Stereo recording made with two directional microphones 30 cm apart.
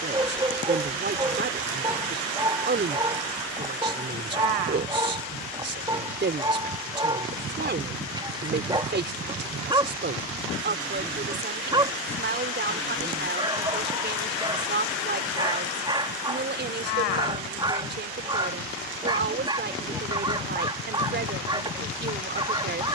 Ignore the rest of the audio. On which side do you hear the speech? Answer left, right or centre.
right.